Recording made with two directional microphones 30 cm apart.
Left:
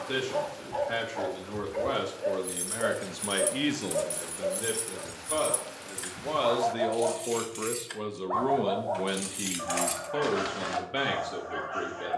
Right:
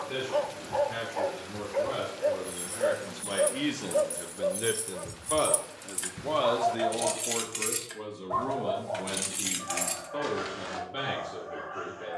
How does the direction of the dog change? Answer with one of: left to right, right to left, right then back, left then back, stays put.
right to left.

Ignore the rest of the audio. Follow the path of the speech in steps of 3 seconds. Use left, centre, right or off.
left, centre, left, left.